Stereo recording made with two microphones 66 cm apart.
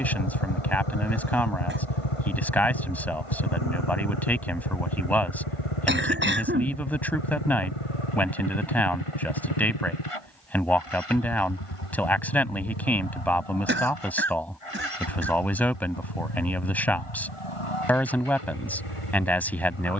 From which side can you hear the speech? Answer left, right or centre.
centre.